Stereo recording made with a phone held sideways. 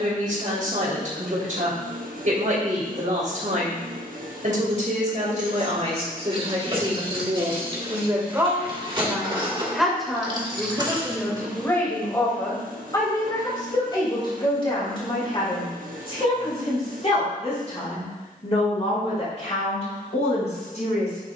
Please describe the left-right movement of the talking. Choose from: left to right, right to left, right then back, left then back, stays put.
right to left.